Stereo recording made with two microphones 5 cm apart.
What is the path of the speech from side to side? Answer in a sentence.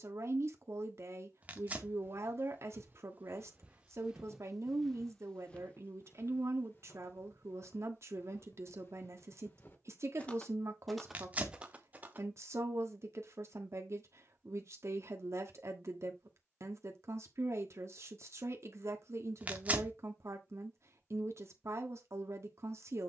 You can hear the speech stay in one place.